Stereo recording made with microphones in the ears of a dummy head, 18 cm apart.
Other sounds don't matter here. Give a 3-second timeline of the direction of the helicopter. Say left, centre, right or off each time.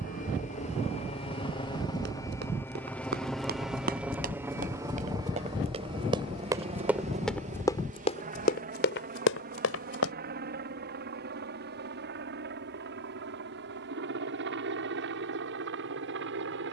left, centre, right, right, right, right.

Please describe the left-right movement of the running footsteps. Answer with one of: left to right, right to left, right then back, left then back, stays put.
right to left.